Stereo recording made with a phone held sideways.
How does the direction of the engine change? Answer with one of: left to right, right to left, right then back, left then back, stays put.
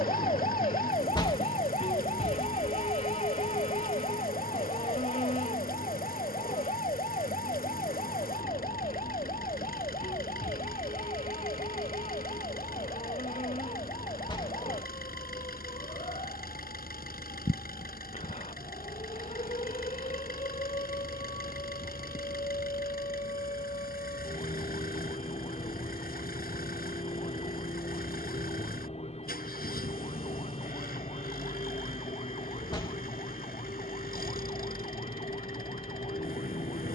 stays put.